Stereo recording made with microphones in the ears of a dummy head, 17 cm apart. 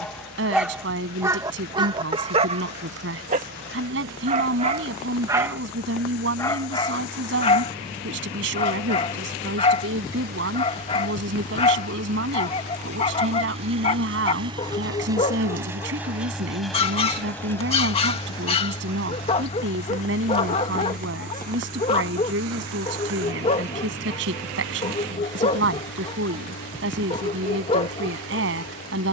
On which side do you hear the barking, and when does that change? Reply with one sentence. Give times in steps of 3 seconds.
In this clip you hear the barking on the right from 0 s and on the left from 6 s.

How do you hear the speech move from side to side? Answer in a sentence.
You can hear the speech stay put.